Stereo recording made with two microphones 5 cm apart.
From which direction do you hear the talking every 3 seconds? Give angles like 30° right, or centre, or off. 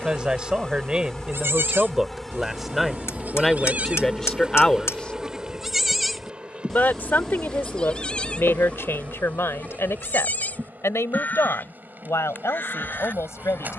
10° right, 10° left, 50° left, 70° left, 80° left.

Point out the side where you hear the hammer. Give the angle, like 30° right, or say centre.
80° left.